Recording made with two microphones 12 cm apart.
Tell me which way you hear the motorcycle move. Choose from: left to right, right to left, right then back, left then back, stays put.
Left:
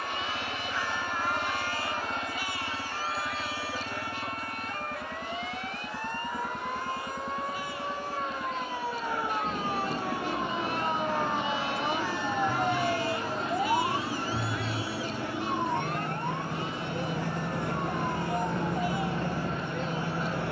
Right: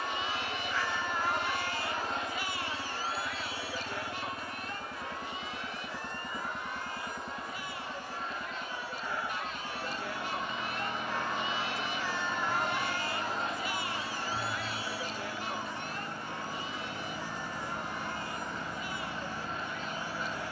stays put.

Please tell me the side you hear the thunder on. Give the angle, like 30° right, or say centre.
80° left.